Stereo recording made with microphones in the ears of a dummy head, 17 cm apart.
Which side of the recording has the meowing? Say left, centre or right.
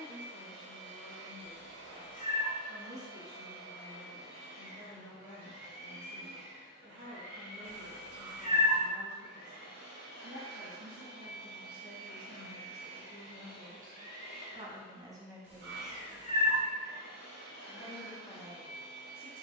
right.